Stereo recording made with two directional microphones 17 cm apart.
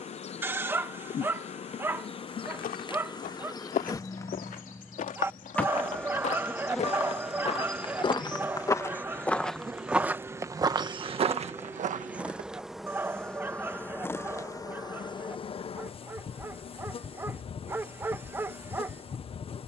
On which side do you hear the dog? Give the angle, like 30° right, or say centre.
10° right.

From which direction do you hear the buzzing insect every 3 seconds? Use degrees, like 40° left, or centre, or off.
40° left, 20° left, centre, 10° right, 10° left, 30° left, 30° left.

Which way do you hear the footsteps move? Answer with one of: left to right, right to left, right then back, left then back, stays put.
left to right.